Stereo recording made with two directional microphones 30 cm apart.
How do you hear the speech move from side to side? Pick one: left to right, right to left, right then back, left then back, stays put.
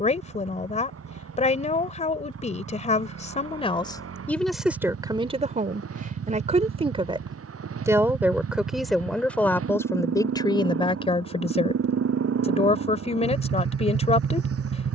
right then back.